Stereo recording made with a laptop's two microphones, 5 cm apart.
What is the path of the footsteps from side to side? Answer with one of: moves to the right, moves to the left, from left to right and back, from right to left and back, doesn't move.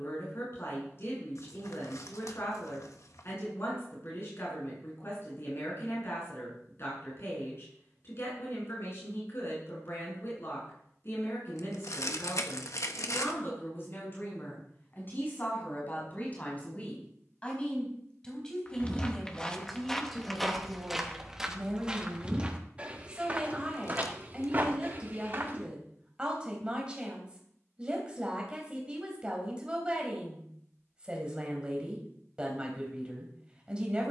moves to the right.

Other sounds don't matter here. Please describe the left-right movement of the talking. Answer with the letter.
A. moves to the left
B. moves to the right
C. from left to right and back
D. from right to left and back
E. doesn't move
B.